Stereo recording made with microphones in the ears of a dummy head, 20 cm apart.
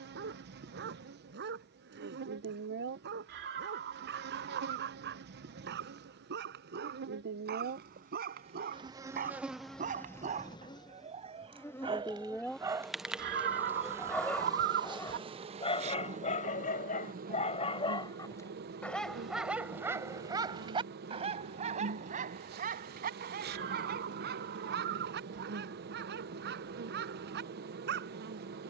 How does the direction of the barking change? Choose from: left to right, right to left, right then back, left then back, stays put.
left then back.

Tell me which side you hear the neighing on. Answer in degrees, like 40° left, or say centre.
50° right.